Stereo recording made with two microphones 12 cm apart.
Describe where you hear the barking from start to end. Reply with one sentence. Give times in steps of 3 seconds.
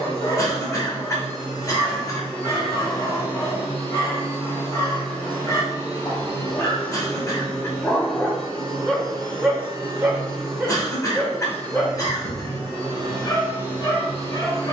You can hear the barking on the left from 0 s, in the centre from 9 s and on the left from 12 s.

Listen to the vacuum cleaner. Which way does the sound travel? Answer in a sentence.
In this clip you hear the vacuum cleaner stay put.